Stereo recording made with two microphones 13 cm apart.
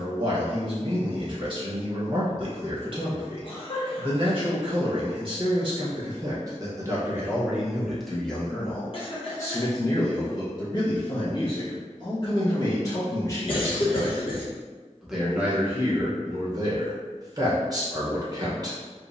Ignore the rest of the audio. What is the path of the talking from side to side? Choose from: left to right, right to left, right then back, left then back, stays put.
left then back.